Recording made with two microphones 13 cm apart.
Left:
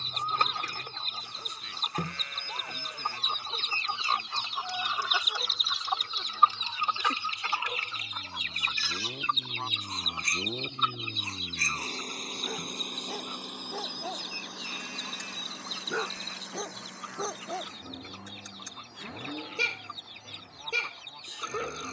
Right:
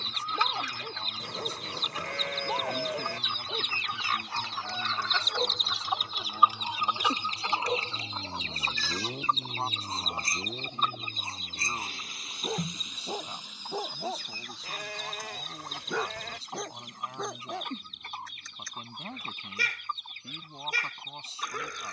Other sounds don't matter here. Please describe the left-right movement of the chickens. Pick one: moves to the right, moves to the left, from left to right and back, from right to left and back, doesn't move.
moves to the right.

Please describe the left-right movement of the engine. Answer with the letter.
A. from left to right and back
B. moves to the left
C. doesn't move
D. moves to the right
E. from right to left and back
B.